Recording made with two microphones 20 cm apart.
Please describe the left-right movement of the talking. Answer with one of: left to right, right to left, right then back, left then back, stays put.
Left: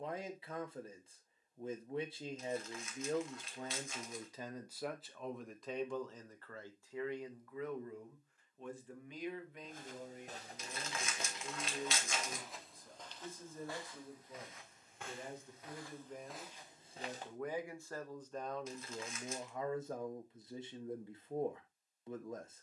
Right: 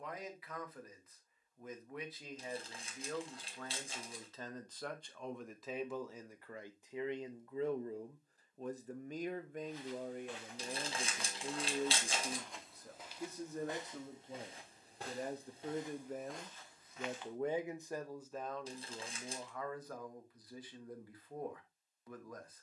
right then back.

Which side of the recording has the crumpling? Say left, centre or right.
right.